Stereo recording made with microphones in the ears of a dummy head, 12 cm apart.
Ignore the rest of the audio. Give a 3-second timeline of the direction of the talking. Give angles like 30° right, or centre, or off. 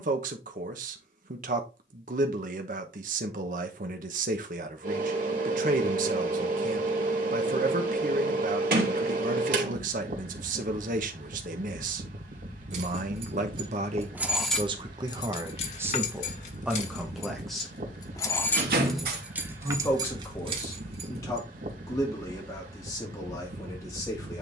60° right, 60° right, 60° right, 60° right, 50° right, 10° right, 20° left, 20° left.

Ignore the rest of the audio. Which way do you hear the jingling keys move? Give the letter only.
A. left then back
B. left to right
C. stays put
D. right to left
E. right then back
A.